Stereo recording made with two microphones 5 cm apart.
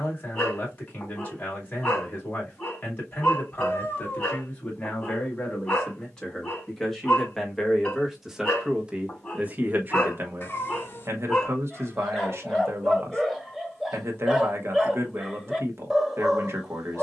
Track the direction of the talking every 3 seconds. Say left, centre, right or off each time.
left, left, centre, right, right, right.